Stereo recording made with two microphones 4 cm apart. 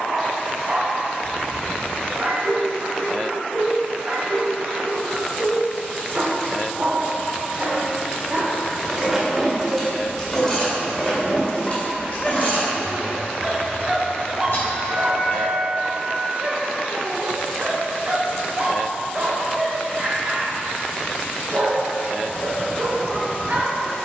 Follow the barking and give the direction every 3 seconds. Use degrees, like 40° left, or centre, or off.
40° right, 40° right, 40° right, 10° right, centre, 30° right, 40° right, 40° right.